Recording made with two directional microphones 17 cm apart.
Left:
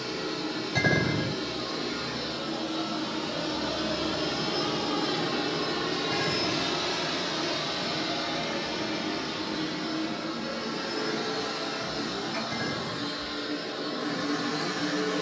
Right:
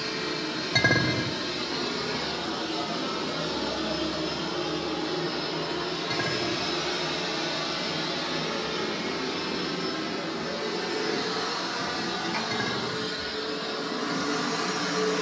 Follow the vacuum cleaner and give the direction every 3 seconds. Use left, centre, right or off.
right, centre, centre, right, right.